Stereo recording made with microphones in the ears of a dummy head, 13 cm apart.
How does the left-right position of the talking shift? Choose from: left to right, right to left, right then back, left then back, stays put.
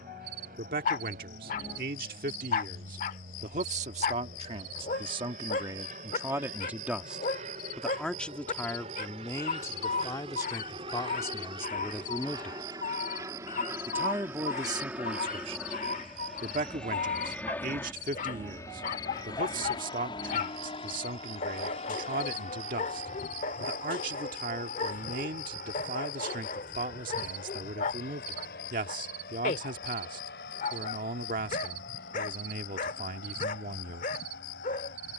left then back.